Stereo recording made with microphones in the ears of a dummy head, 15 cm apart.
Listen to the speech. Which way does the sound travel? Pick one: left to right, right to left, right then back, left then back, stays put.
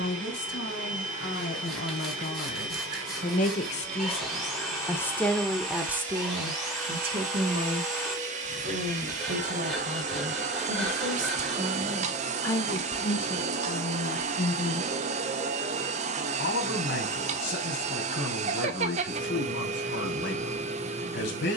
right then back.